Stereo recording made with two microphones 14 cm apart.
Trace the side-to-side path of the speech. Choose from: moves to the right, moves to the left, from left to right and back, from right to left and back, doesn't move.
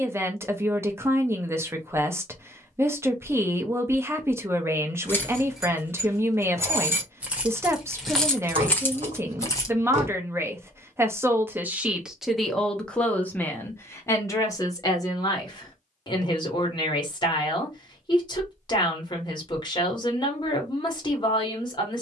moves to the left.